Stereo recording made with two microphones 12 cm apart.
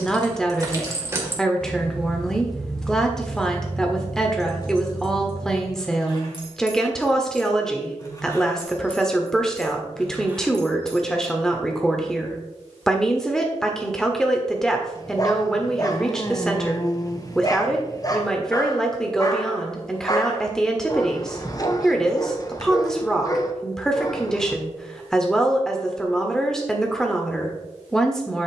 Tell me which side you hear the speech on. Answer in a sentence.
In this clip you hear the speech in the centre.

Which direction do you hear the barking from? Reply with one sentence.
You can hear the barking on the left.